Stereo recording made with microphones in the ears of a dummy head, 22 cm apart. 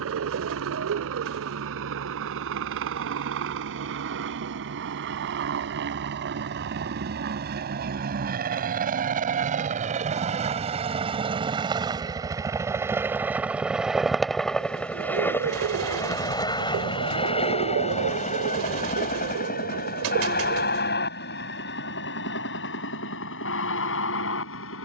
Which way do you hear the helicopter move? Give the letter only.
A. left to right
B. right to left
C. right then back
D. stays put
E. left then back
B.